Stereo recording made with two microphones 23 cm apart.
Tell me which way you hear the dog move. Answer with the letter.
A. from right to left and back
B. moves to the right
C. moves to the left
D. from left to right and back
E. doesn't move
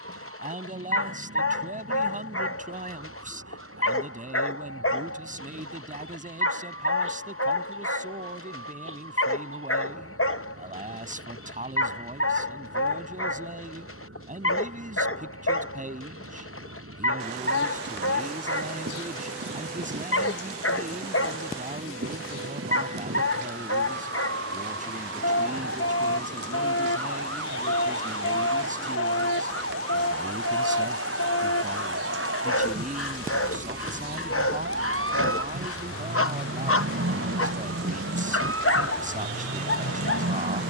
E.